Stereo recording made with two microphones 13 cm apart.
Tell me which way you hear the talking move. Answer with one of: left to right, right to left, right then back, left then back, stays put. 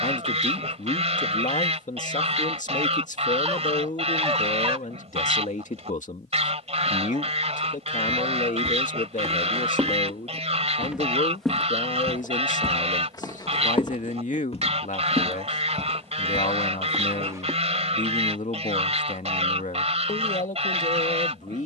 stays put.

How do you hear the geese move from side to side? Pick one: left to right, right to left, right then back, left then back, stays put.
stays put.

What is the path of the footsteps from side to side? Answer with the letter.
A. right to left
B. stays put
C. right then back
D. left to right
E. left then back
E.